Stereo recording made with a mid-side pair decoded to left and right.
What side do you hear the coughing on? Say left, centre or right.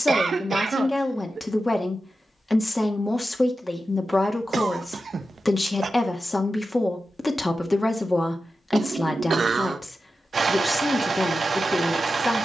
right.